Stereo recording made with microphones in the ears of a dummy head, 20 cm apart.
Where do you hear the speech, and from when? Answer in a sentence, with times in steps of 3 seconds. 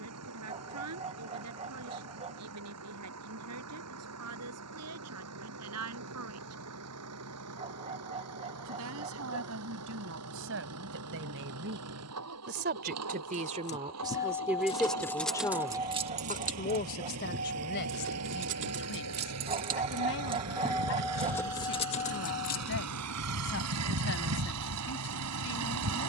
You can hear the speech on the right from 0 s and on the left from 15 s.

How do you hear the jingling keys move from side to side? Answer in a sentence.
You can hear the jingling keys move from left to right and back again.